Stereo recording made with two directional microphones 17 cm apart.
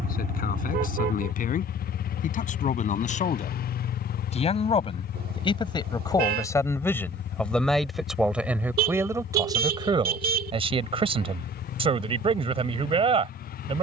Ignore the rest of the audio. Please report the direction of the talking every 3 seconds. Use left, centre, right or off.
left, left, centre, right, right.